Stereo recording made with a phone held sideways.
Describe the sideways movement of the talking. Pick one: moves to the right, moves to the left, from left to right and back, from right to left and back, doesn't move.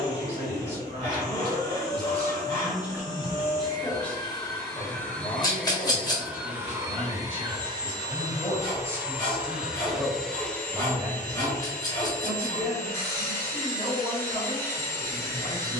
from right to left and back.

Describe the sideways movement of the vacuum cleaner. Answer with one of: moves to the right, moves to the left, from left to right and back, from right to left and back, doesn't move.
from left to right and back.